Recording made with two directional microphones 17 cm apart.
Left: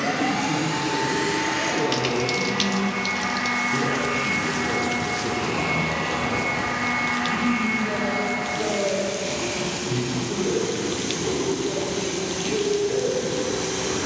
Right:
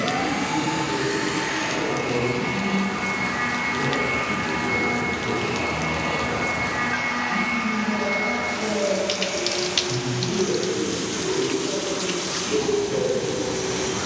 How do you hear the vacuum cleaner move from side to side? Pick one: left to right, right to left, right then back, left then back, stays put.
stays put.